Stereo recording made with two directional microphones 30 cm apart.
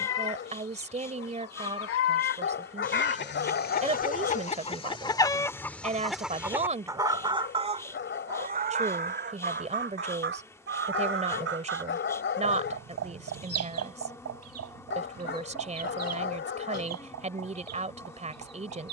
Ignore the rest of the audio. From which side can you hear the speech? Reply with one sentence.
You can hear the speech on the right.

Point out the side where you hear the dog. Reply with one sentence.
You can hear the dog on the left.